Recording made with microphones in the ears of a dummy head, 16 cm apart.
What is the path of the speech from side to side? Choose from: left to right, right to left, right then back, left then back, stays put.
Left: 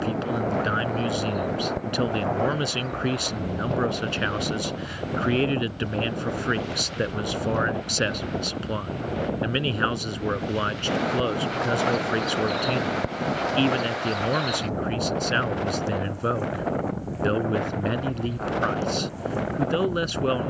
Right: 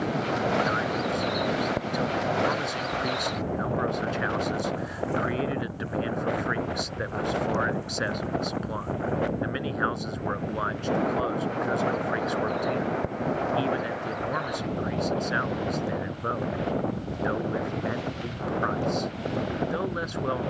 stays put.